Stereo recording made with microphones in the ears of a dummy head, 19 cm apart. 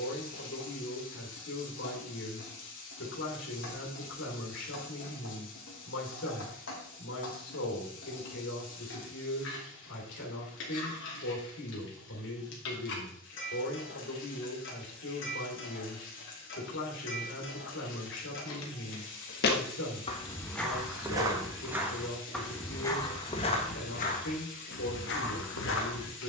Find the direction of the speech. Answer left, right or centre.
left.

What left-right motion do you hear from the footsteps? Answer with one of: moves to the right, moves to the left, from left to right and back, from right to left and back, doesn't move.
from left to right and back.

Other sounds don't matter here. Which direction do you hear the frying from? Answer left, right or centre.
left.